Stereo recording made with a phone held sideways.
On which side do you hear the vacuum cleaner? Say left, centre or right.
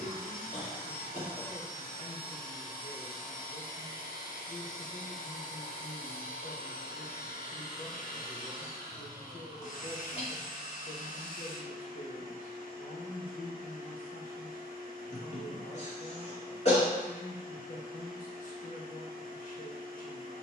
left.